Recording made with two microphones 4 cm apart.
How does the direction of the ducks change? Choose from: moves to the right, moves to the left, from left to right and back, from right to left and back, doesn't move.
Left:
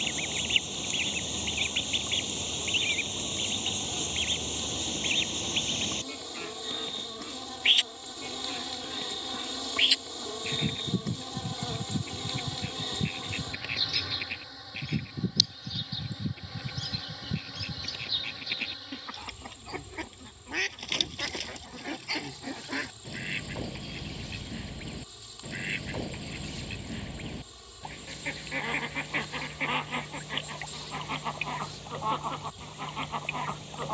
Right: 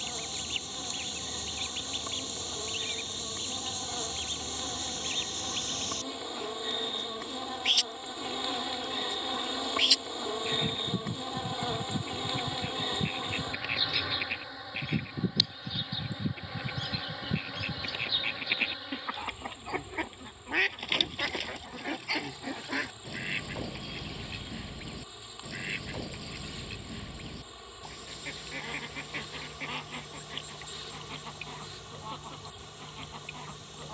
from left to right and back.